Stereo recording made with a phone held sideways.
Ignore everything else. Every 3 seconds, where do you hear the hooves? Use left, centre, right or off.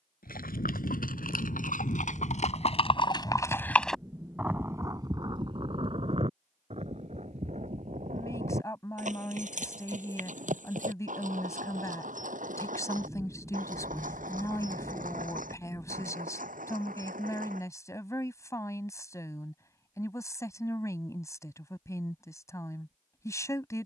left, centre, right, right, right, right, off, off.